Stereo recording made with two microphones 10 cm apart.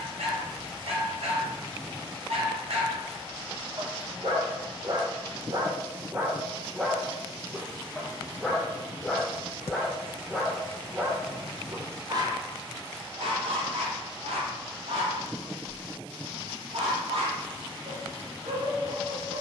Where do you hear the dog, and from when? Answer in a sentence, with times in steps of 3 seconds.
You can hear the dog on the right from 0 s, in the centre from 6 s and on the right from 12 s.